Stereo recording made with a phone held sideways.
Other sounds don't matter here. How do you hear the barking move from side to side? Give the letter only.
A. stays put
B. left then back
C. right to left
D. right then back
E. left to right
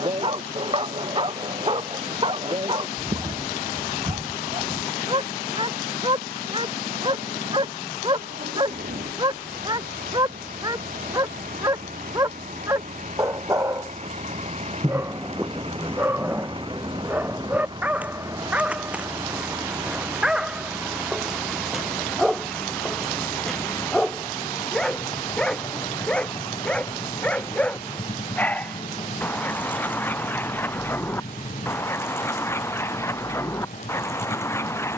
C.